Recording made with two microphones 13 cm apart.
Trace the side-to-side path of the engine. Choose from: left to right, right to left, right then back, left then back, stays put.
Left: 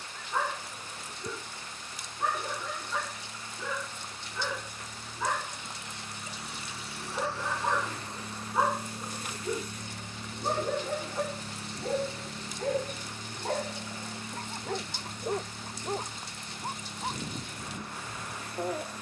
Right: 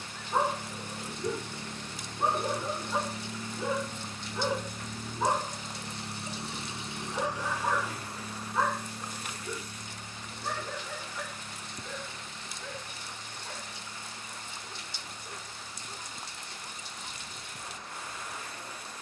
right to left.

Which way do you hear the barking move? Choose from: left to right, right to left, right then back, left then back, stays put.
right to left.